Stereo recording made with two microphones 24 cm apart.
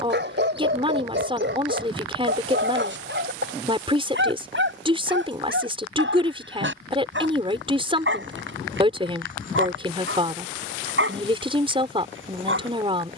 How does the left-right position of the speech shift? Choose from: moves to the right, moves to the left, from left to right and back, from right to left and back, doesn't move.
doesn't move.